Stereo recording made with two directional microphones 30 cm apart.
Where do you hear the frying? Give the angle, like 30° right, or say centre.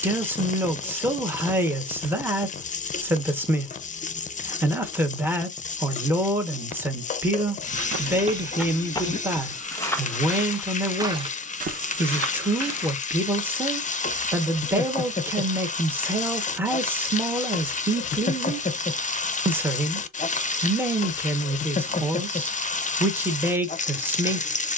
20° left.